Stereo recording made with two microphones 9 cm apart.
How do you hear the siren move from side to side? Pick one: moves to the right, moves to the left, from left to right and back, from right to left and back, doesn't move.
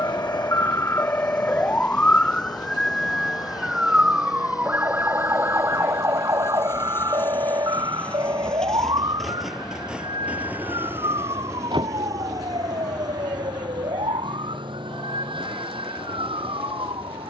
moves to the right.